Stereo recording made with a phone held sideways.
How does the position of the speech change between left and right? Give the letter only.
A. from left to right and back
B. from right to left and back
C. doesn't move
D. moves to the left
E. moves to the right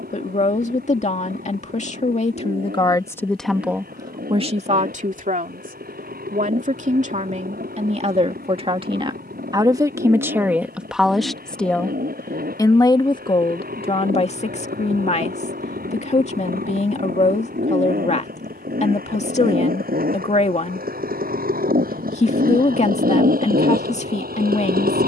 A.